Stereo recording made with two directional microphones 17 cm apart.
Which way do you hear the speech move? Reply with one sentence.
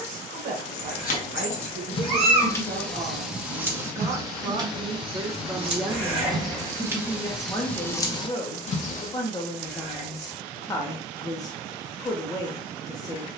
In this clip you hear the speech move to the left.